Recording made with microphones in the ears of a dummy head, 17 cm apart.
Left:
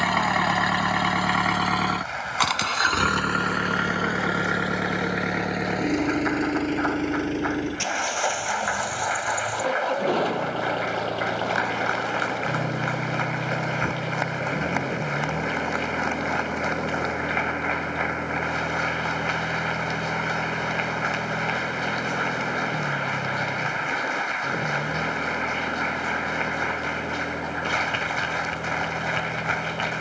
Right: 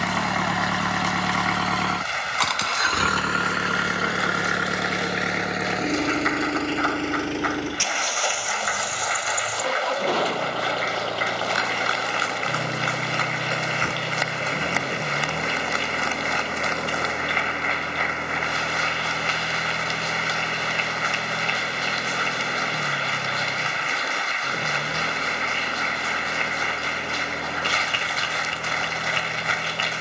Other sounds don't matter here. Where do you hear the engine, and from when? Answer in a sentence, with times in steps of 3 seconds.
In this clip you hear the engine in the centre from 0 s and on the right from 3 s.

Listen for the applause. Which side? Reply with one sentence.
In this clip you hear the applause on the right.